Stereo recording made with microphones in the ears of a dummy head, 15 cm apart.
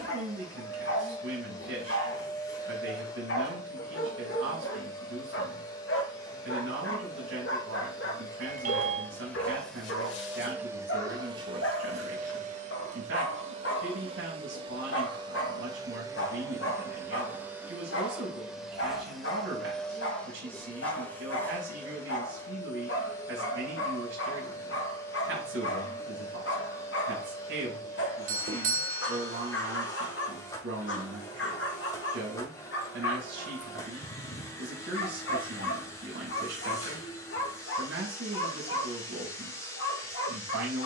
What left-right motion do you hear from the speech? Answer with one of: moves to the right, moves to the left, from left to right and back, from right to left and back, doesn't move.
doesn't move.